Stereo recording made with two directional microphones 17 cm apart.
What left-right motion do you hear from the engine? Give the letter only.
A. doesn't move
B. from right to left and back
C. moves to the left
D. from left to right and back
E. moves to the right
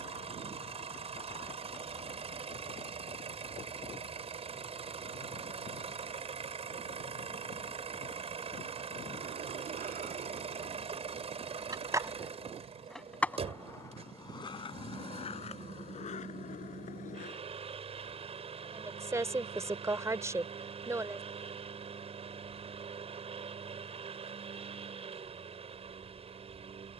A.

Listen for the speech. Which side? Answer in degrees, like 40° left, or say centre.
20° right.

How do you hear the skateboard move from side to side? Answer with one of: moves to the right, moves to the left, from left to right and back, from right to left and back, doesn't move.
moves to the left.